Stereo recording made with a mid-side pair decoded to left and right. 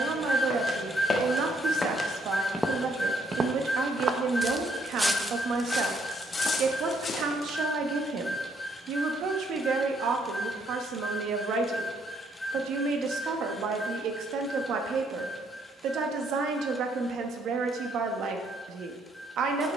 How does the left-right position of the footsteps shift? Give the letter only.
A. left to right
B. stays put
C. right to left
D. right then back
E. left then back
D.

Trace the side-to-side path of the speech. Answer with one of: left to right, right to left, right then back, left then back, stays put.
stays put.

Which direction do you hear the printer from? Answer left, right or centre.
centre.